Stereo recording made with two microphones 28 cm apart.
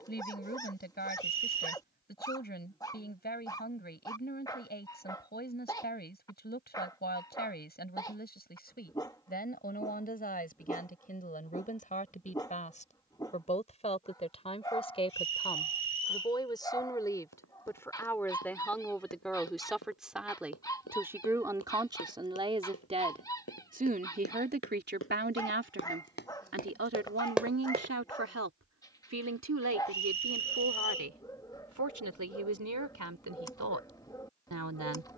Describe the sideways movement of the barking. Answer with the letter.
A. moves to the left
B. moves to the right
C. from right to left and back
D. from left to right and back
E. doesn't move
E.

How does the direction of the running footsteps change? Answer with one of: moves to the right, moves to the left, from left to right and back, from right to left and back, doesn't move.
moves to the right.